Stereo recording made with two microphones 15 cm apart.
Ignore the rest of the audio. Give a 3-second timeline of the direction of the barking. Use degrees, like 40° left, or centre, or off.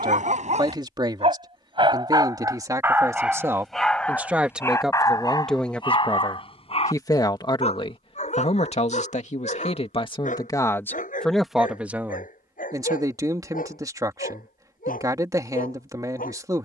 40° right, 10° left, 40° left, 60° left, 60° left, 70° left.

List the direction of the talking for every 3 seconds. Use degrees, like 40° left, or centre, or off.
30° right, 10° right, 30° left, 20° left, 20° right, 20° right.